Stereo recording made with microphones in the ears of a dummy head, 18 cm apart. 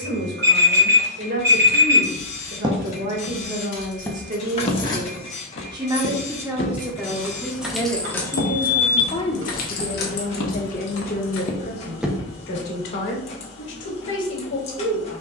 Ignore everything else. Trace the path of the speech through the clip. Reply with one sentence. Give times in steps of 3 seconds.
You can hear the speech on the right from 0 s, in the centre from 6 s and on the left from 9 s.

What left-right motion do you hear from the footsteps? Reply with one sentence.
You can hear the footsteps go left and come back.